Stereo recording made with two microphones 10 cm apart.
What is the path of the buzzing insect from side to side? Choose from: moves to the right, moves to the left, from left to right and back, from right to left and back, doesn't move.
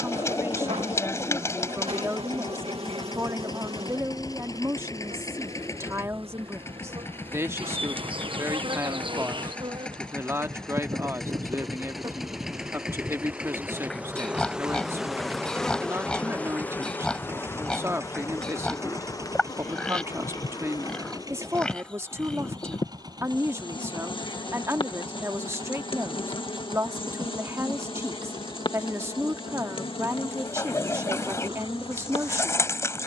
moves to the left.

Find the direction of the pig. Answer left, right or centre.
centre.